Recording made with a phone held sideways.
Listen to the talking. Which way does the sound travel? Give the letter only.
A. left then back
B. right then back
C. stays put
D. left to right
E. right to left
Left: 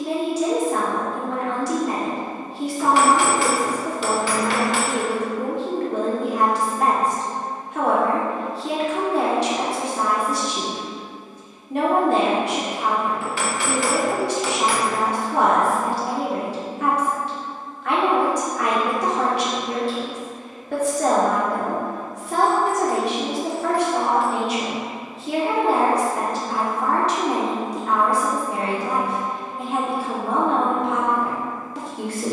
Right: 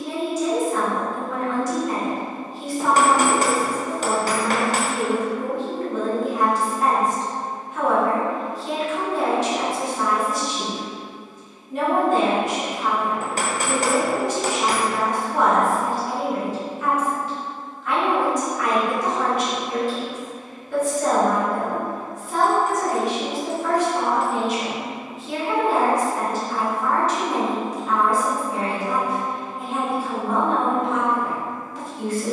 C.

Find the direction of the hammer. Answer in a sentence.
In this clip you hear the hammer on the right.